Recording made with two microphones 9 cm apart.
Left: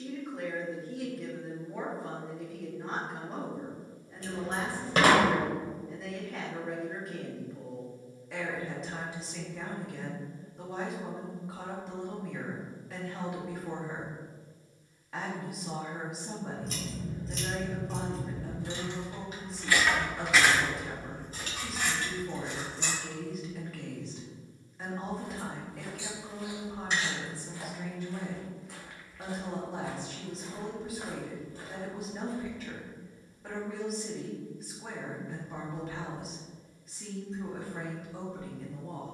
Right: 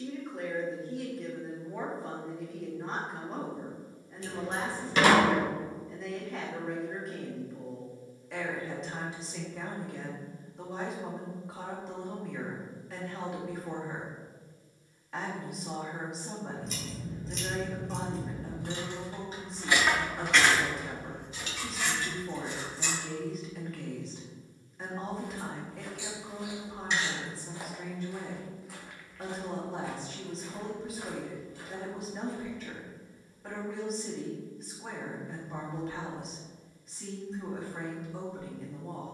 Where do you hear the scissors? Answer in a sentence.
You can hear the scissors on the left.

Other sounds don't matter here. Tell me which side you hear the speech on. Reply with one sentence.
In this clip you hear the speech in the centre.